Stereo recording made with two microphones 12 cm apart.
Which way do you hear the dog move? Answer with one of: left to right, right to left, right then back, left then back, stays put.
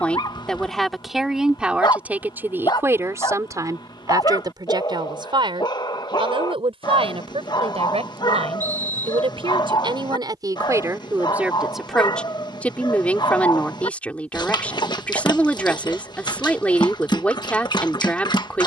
stays put.